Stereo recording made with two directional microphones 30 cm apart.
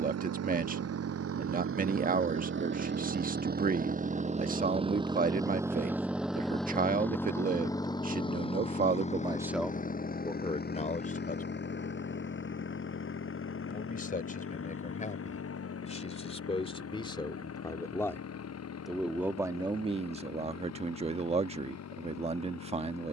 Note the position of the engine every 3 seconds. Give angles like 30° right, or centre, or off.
50° right, 20° right, 10° left, 30° left, 40° left, 50° left, 50° left, 60° left.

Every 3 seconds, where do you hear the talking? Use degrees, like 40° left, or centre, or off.
30° right, 30° right, 30° right, 10° left, 30° left, 20° left, 10° right, 20° right.